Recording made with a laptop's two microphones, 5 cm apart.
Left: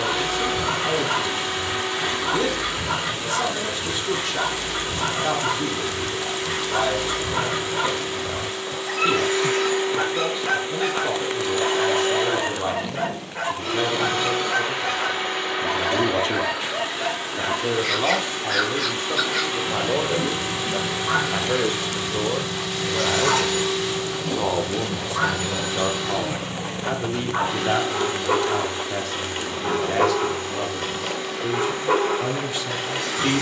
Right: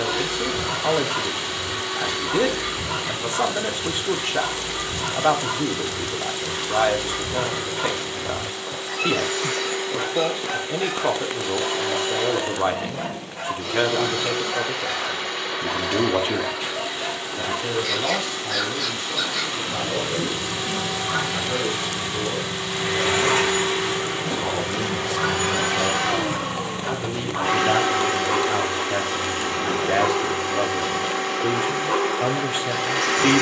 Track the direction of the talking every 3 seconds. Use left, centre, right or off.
right, right, right, right, right, centre, left, left, left, centre, right.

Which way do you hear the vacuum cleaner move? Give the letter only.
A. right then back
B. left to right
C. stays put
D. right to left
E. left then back
B.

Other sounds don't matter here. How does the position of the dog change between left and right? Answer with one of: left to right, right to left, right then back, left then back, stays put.
stays put.